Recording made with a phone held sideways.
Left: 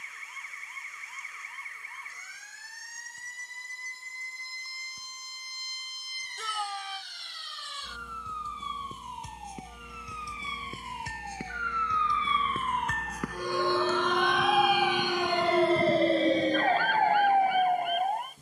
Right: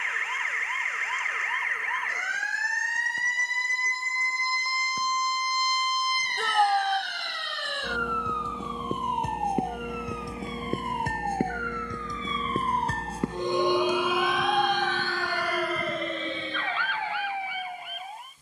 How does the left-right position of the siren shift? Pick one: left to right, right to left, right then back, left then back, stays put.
right to left.